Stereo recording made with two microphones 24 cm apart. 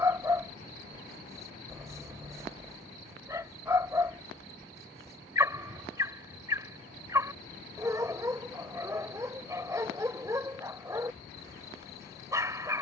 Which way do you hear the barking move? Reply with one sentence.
In this clip you hear the barking stay put.